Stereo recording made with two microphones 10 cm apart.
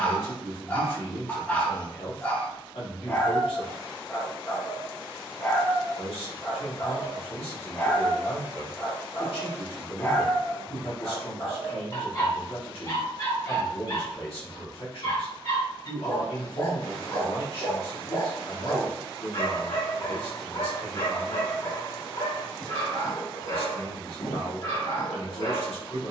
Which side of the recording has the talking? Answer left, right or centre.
left.